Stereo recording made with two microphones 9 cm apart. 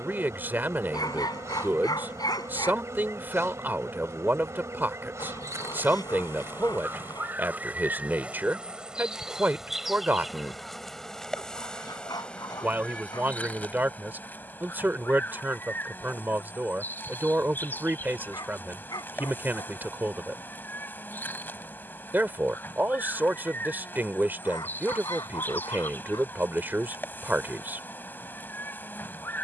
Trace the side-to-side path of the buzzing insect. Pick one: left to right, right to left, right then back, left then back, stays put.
right to left.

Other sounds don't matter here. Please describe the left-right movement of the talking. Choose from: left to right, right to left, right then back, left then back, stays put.
stays put.